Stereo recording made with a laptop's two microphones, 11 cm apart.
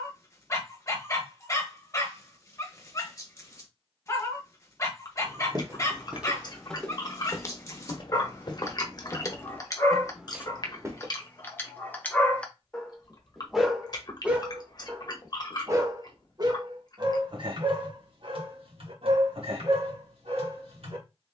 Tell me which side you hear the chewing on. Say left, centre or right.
left.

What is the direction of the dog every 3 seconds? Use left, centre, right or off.
left, left, left, left, centre, right, right.